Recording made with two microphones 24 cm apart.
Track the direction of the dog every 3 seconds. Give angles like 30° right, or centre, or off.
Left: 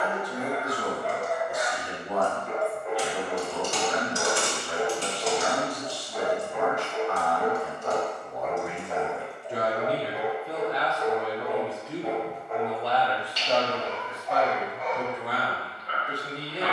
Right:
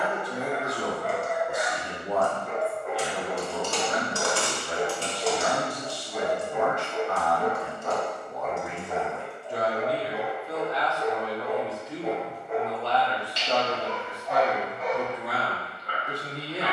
50° right, 30° right, centre, 10° left, 30° right, 50° right.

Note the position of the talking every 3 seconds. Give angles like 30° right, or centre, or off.
30° right, 30° right, 20° right, 30° left, centre, 20° right.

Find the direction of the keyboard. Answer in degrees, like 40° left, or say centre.
20° left.